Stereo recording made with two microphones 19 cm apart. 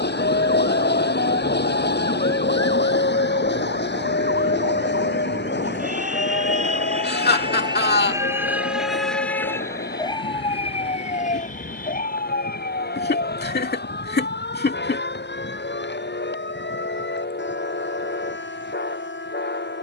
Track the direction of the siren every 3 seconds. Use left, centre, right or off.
right, right, right, left, left, left, left.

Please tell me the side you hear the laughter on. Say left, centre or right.
left.